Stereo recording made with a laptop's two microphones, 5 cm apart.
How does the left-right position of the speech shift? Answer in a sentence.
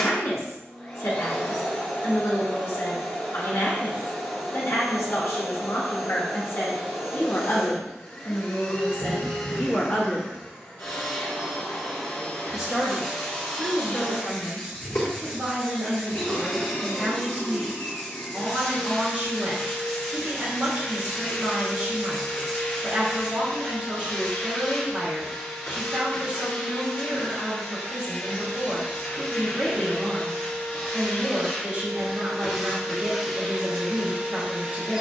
You can hear the speech move to the right.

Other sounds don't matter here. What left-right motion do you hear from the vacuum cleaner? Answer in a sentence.
In this clip you hear the vacuum cleaner move from left to right.